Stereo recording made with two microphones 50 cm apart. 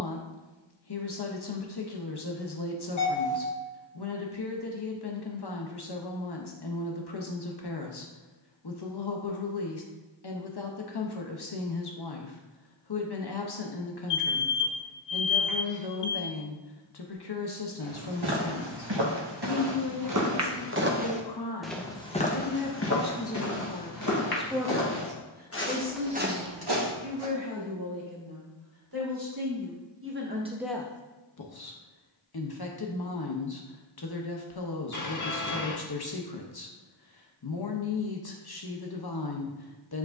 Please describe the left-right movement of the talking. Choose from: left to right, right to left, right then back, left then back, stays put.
right then back.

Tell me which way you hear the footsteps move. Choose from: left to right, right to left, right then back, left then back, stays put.
left then back.